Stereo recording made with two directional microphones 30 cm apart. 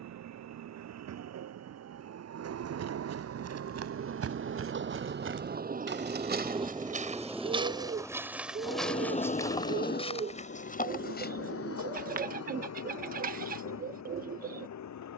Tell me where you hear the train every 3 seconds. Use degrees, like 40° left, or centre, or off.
60° right, 40° right, centre, 40° left, 60° left.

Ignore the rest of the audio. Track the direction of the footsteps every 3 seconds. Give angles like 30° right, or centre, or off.
60° right, 50° right, 20° right, 20° left, off.